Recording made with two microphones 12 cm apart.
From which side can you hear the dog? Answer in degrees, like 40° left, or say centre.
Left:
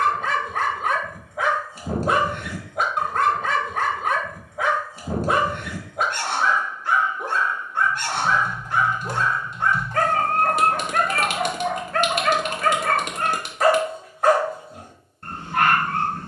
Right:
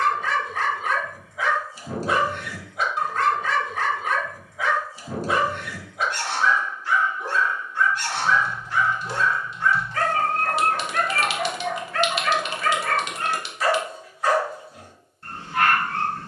50° left.